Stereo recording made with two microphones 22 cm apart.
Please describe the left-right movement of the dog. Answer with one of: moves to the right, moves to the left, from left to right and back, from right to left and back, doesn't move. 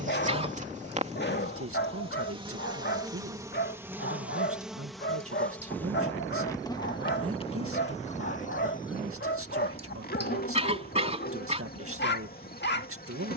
doesn't move.